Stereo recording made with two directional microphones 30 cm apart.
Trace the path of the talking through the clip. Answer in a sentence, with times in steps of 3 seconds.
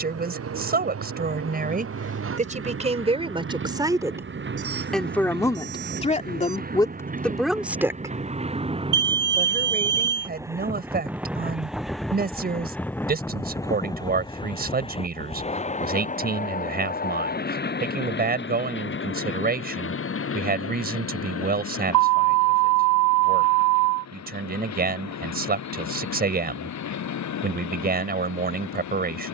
In this clip you hear the talking on the right from 0 s, in the centre from 3 s and on the right from 9 s.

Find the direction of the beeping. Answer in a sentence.
You can hear the beeping on the right.